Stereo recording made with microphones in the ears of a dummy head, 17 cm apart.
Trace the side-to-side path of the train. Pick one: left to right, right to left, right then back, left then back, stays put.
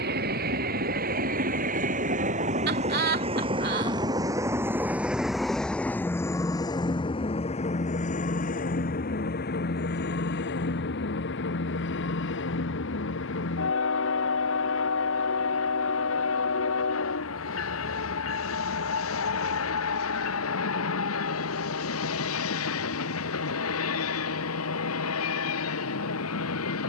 right to left.